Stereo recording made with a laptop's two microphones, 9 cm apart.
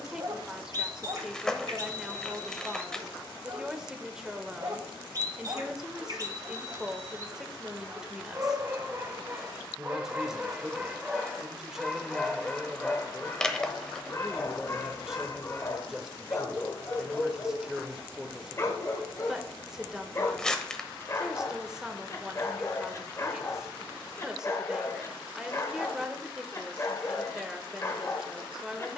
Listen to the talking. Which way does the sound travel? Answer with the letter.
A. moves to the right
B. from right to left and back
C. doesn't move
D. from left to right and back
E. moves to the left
C.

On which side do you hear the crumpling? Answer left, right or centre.
centre.